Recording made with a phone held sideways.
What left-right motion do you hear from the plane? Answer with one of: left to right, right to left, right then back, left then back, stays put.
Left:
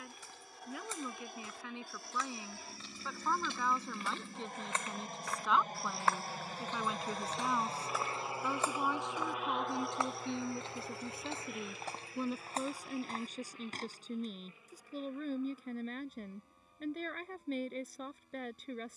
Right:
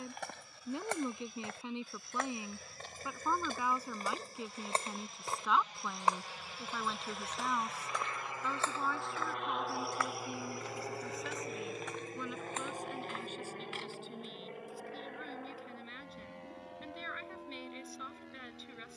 left to right.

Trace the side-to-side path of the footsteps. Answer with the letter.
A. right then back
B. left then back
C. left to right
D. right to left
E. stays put
D.